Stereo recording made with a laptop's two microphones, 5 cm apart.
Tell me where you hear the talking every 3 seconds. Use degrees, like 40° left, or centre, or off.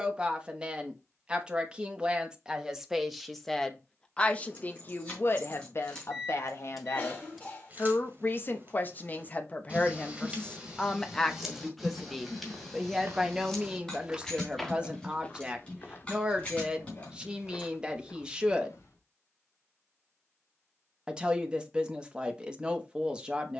10° right, 30° left, 50° left, 20° left, 10° right, 20° right, 20° right, 20° right.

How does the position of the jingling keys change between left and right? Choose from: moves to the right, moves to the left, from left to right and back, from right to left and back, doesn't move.
from left to right and back.